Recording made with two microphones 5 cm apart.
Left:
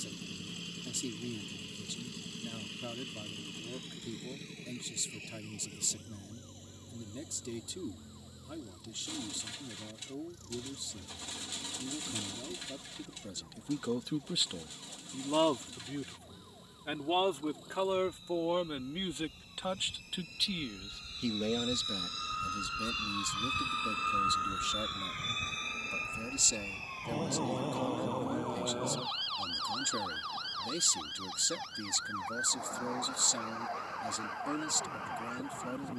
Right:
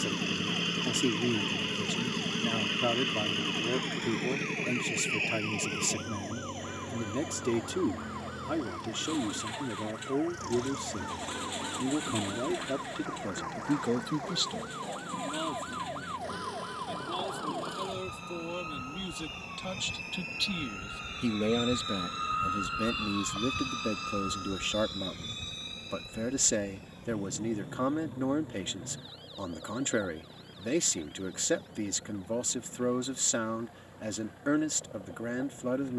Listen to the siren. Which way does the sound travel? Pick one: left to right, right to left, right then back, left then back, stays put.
right to left.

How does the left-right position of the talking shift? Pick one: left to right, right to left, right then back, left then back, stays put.
left then back.